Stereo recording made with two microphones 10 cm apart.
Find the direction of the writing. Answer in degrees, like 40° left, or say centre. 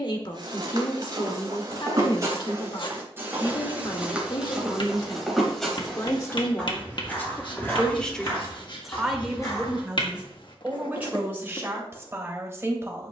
60° left.